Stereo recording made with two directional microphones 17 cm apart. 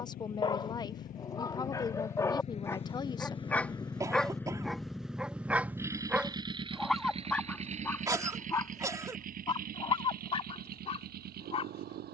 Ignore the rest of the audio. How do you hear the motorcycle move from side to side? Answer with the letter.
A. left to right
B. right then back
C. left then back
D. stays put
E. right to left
A.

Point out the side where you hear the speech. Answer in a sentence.
You can hear the speech on the left.